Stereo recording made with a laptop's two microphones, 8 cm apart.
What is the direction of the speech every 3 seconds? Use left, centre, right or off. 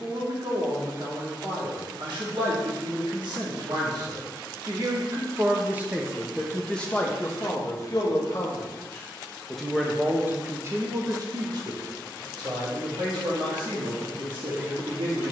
right, right, left, right, right.